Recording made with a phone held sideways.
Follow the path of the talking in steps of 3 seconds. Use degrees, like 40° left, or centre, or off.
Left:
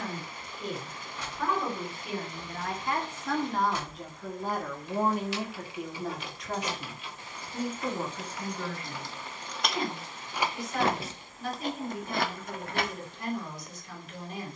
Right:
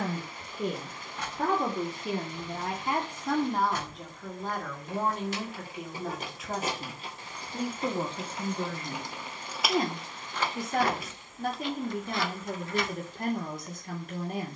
40° right, centre, 20° right, 50° right, 50° right.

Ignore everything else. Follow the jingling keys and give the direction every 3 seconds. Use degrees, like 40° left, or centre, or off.
60° right, 50° right, 30° right, 10° left, 60° left.